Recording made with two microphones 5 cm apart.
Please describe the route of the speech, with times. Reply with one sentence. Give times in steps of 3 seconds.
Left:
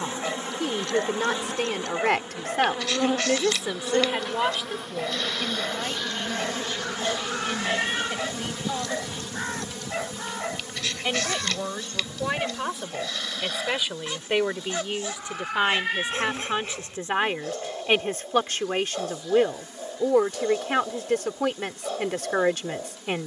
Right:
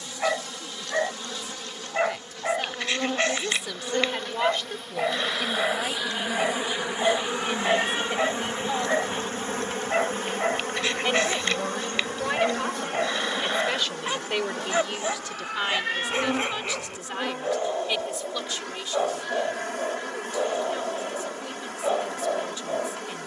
You can hear the speech on the left from 0 s, in the centre from 3 s and on the left from 15 s.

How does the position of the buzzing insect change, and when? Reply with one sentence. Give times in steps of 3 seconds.
In this clip you hear the buzzing insect on the left from 0 s, in the centre from 3 s and on the right from 6 s.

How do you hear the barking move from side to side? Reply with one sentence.
In this clip you hear the barking stay in one place.